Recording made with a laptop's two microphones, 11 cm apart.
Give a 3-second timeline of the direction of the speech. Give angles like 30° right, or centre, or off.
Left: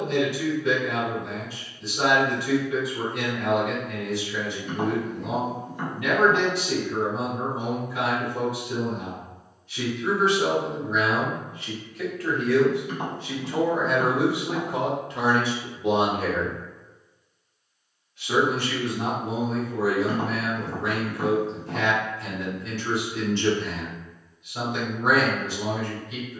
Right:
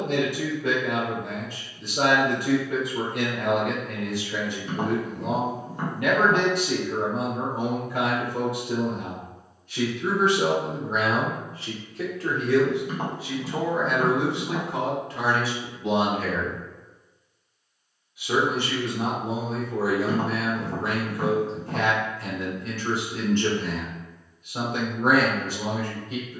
60° right, 60° right, 60° right, 50° right, centre, 20° left, 30° right, 50° right, 50° right.